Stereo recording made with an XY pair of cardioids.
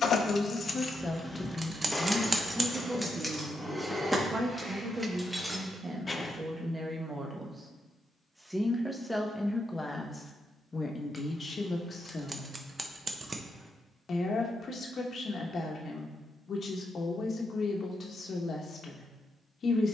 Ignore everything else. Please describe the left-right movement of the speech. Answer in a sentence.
In this clip you hear the speech move from left to right and back again.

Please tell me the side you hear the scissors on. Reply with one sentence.
You can hear the scissors on the right.